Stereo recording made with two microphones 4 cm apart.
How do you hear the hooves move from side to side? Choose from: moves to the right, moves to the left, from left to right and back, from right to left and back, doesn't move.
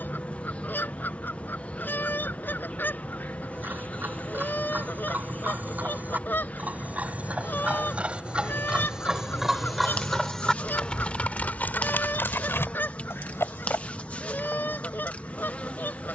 moves to the left.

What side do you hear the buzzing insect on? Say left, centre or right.
left.